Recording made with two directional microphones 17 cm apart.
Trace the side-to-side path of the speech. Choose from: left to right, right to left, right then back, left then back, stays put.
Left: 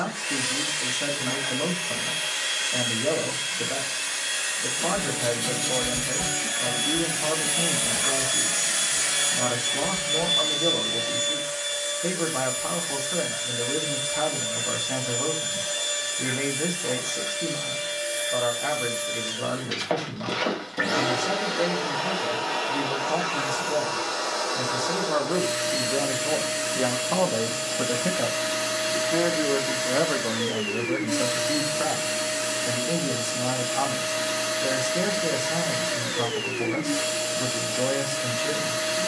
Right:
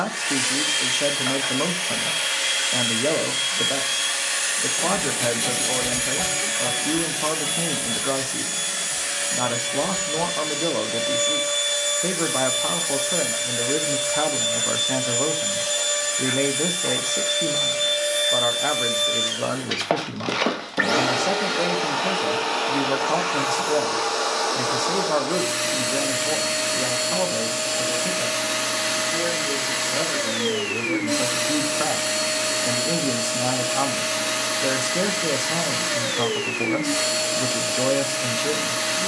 left then back.